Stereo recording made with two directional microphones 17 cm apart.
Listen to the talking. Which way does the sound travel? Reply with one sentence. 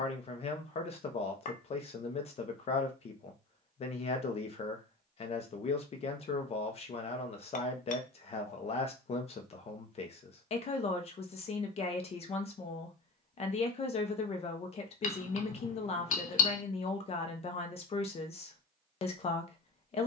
In this clip you hear the talking stay put.